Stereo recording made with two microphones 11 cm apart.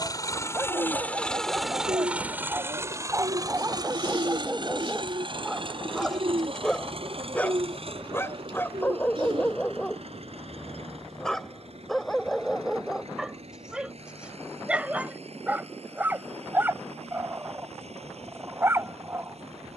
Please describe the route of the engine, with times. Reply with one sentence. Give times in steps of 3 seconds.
You can hear the engine in the centre from 0 s and on the right from 3 s.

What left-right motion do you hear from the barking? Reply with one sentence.
You can hear the barking move from right to left and back again.